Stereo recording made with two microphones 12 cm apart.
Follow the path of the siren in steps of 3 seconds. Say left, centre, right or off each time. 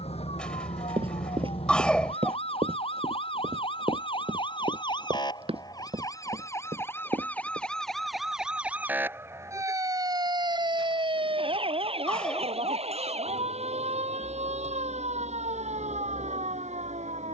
left, left, centre, right, right, right.